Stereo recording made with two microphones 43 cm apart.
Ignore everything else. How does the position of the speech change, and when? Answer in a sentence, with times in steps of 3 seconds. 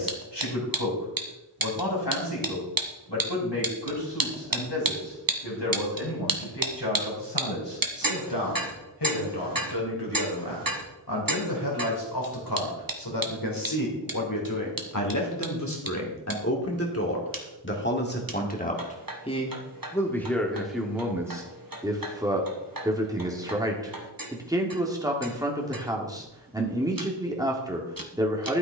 In this clip you hear the speech on the left from 0 s and in the centre from 18 s.